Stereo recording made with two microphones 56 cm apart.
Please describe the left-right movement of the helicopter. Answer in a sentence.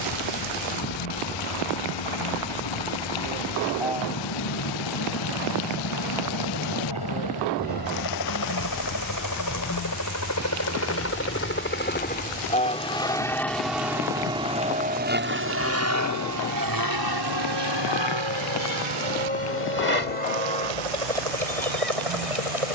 You can hear the helicopter move from left to right.